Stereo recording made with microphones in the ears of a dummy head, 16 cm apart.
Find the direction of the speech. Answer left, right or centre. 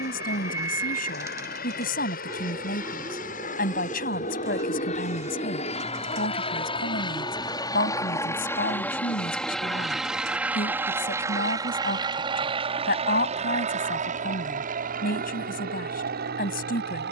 left.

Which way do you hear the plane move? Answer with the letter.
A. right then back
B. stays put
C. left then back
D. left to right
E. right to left
D.